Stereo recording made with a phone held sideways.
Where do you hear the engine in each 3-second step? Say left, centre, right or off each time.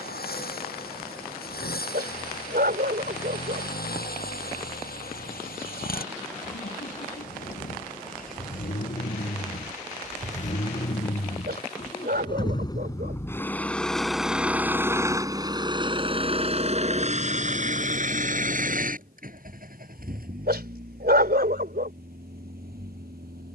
left, left, left, left, centre, right, right, right.